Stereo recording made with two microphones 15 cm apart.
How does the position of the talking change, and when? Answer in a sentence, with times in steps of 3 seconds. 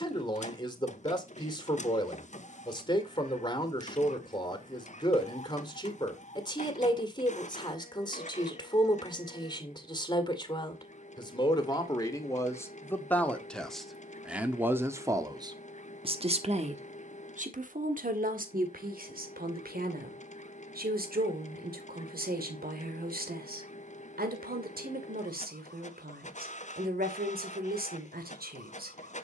In this clip you hear the talking on the left from 0 s, in the centre from 12 s and on the right from 15 s.